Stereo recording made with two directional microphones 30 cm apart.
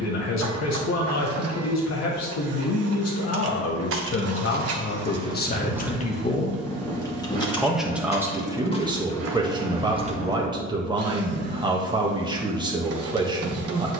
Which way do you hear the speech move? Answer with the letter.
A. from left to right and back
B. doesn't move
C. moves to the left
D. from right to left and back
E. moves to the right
E.